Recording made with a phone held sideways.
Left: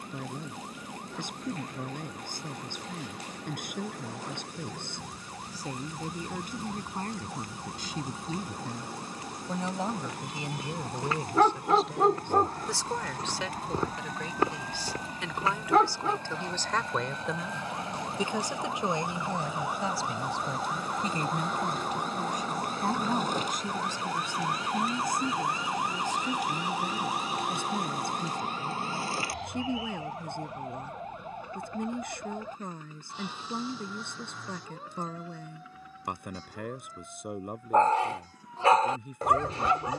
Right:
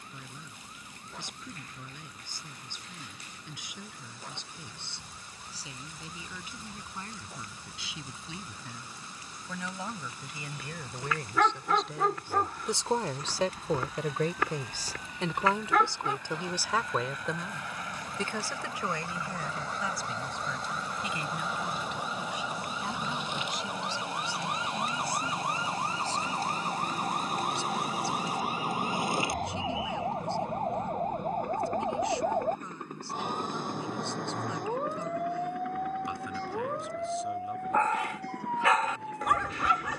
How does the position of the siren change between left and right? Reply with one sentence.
In this clip you hear the siren move to the right.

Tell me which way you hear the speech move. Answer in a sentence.
You can hear the speech move from left to right and back again.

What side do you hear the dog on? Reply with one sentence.
In this clip you hear the dog on the left.